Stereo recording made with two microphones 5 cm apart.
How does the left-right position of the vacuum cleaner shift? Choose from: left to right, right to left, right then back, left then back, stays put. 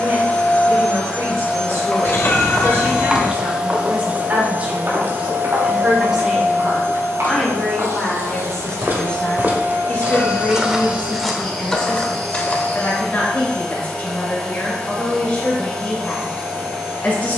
right then back.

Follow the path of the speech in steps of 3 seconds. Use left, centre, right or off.
right, right, centre, left, left, left.